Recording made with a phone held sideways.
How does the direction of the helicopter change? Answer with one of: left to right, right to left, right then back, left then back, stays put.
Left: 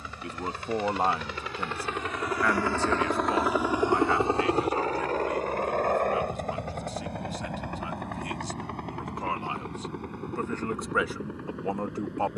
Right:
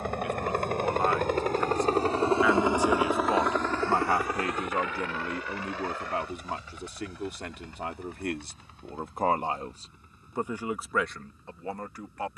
right to left.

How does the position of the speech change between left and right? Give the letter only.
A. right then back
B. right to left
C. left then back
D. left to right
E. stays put
A.